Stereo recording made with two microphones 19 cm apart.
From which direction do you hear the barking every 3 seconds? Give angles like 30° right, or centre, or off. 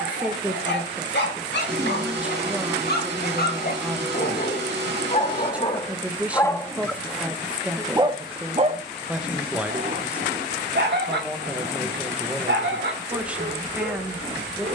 60° left, 40° left, 10° right, 60° right, 70° right.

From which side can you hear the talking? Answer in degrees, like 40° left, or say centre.
10° right.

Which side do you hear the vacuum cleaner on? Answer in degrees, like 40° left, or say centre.
60° right.